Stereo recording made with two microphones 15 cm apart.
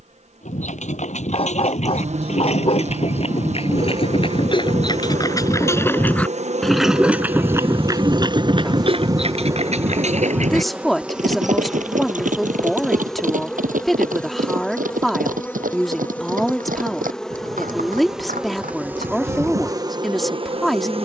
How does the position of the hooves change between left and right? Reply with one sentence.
You can hear the hooves travel towards the right.